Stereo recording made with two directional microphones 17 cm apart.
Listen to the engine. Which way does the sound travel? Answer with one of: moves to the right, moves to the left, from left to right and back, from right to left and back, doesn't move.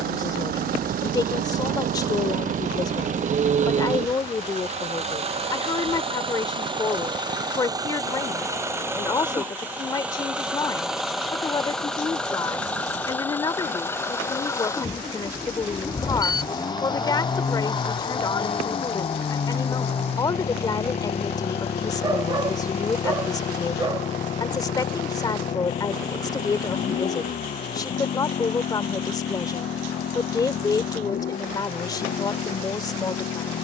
moves to the left.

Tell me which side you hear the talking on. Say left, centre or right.
left.